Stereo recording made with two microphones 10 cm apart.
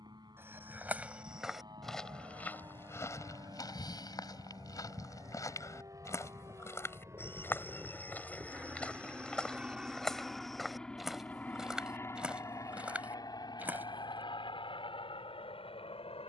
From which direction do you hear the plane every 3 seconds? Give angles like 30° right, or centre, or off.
50° right, 50° right, 30° right, centre, 40° left, 60° left.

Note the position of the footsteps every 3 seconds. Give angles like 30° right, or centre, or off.
centre, 40° left, 20° left, centre, 10° right, off.